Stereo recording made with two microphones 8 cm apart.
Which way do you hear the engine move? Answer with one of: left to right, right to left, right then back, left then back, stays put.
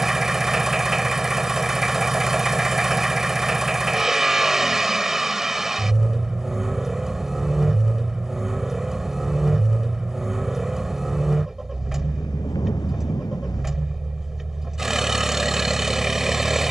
stays put.